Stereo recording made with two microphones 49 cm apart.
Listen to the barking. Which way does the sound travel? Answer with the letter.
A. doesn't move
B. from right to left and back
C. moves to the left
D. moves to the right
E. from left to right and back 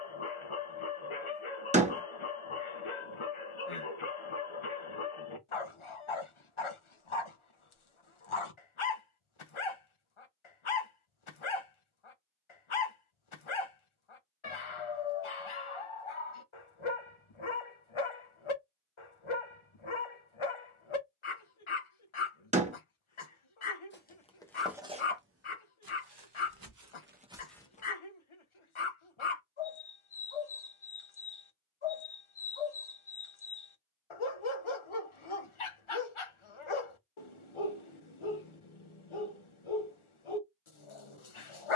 A.